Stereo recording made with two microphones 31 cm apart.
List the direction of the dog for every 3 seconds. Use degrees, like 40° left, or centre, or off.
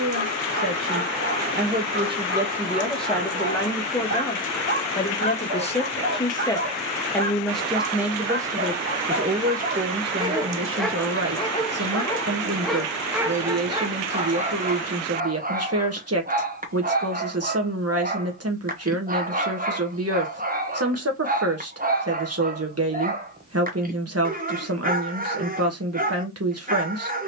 30° right, 30° right, 30° right, 10° right, 10° right, 30° right, 30° right, 30° right, 30° right.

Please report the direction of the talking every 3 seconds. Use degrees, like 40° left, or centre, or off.
30° right, 20° left, centre, 40° right, 50° right, 50° right, 50° right, 50° right, 50° right.